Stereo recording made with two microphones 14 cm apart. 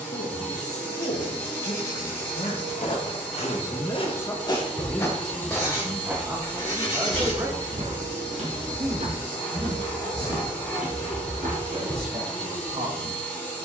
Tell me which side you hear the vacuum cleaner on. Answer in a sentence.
In this clip you hear the vacuum cleaner in the centre.